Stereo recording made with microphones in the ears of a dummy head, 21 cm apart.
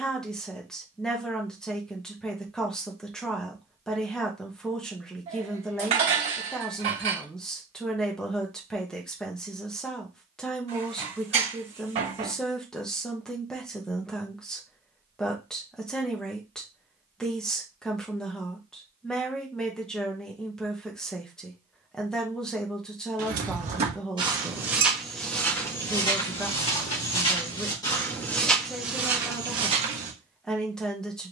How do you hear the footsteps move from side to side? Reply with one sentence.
You can hear the footsteps move from right to left and back again.